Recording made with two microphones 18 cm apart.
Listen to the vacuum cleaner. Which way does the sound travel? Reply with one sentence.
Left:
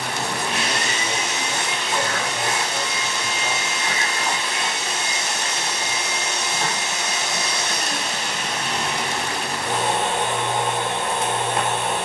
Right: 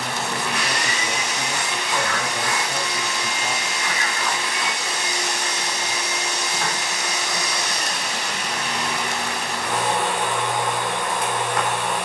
In this clip you hear the vacuum cleaner stay put.